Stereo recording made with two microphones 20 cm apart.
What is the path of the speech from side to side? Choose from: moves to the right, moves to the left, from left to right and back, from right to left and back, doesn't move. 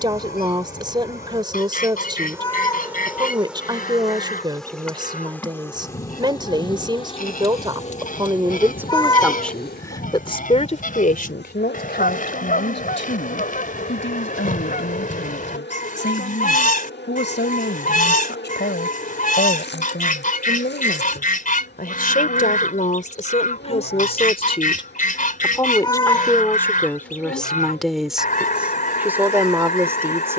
from right to left and back.